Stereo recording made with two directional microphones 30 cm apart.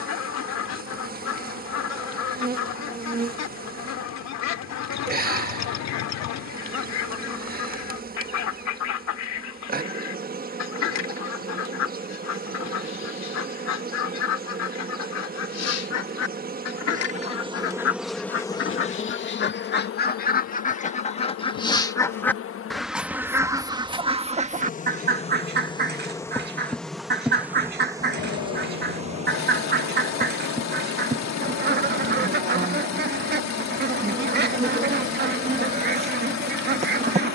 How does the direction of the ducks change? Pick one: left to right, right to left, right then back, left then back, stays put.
left to right.